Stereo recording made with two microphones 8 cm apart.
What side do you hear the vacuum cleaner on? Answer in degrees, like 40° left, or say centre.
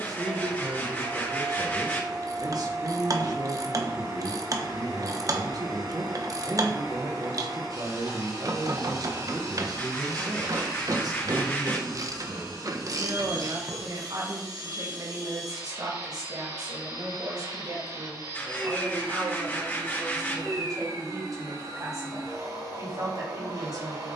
60° right.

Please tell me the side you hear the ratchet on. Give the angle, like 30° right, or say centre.
50° right.